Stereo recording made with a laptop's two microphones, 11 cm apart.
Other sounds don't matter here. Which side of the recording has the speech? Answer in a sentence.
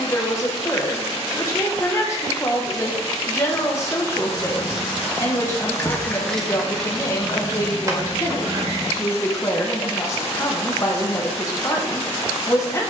You can hear the speech on the left.